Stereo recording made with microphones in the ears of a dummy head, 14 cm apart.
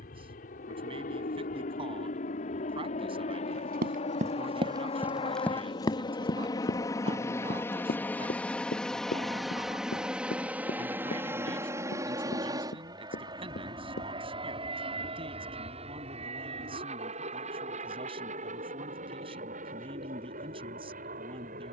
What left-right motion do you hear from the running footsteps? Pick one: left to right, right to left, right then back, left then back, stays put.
right to left.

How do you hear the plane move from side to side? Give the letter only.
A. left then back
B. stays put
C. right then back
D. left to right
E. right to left
D.